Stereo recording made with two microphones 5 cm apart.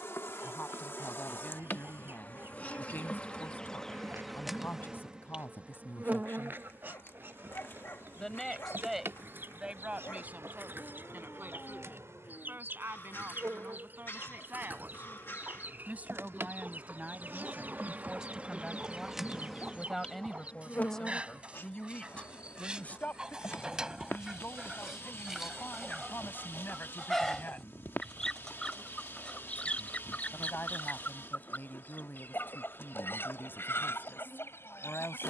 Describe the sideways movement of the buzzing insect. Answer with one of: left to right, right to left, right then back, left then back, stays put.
right then back.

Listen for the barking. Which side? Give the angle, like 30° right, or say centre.
50° left.